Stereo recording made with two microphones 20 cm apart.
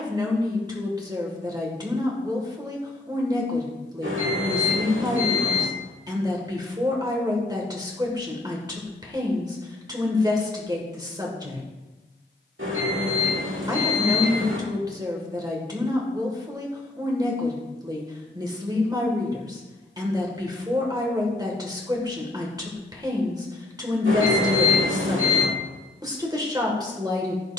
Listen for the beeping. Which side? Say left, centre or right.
right.